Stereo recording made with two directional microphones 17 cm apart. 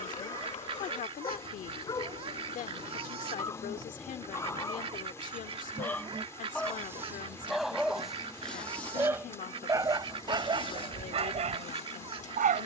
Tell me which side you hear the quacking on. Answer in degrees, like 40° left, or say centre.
30° right.